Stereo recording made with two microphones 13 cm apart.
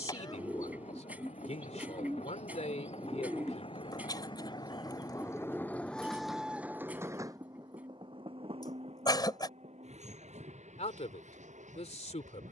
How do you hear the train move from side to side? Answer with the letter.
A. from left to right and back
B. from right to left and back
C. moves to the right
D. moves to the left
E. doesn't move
C.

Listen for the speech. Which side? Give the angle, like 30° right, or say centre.
60° left.